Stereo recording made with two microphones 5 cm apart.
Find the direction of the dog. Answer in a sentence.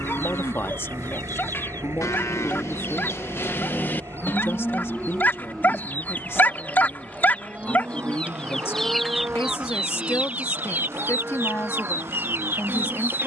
You can hear the dog on the left.